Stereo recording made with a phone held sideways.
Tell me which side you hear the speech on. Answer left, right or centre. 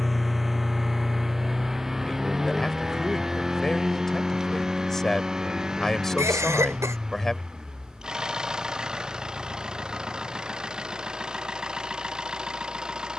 centre.